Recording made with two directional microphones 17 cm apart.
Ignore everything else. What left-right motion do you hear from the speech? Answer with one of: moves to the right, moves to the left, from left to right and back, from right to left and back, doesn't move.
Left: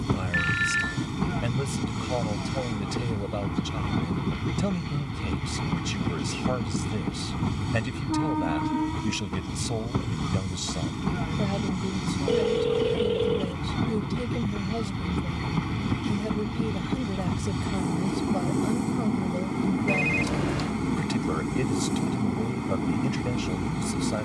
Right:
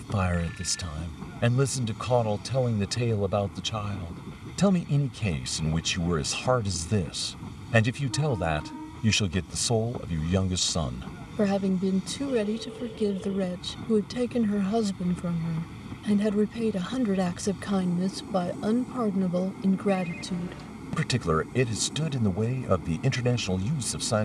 doesn't move.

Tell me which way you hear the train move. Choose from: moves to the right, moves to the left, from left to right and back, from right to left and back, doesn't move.
doesn't move.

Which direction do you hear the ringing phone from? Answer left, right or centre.
left.